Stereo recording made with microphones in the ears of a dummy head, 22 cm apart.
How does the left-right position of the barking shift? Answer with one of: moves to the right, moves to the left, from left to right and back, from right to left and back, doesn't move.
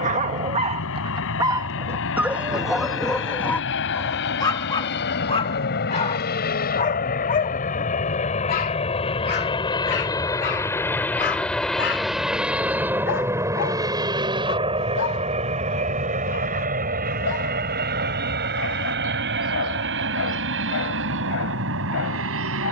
moves to the left.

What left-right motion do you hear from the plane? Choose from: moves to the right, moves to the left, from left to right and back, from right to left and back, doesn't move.
moves to the right.